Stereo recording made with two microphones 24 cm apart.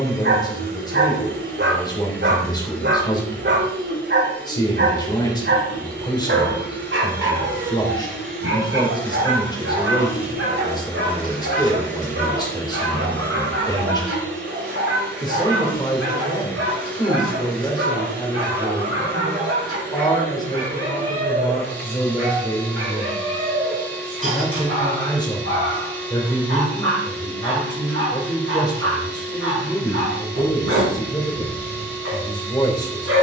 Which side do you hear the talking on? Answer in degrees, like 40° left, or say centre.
20° left.